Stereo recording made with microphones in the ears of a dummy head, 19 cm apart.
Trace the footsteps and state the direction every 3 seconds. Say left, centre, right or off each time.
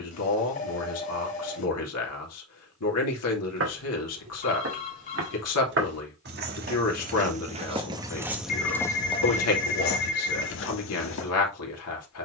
off, right, right, left.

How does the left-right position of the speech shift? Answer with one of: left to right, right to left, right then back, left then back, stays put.
stays put.